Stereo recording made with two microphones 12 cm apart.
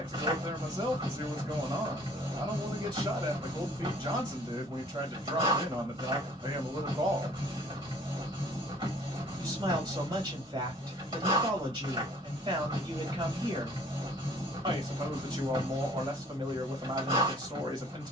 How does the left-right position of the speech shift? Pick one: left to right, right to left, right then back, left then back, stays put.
stays put.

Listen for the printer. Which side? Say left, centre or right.
right.